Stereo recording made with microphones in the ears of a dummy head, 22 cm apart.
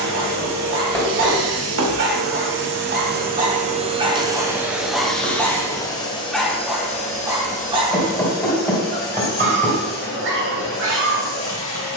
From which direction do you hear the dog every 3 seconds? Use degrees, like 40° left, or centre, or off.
50° right, 10° right, 10° right, 50° right.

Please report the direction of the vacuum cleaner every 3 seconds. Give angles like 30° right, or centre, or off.
60° right, 10° right, 30° left, 50° left.